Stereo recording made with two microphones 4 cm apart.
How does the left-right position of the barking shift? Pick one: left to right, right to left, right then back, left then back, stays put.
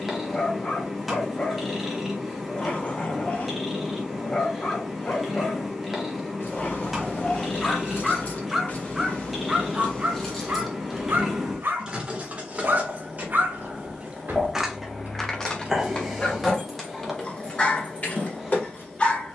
right then back.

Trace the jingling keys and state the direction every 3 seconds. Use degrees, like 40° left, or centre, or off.
off, off, 50° left, 10° left, 40° right, 10° left, 40° left.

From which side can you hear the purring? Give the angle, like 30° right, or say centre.
centre.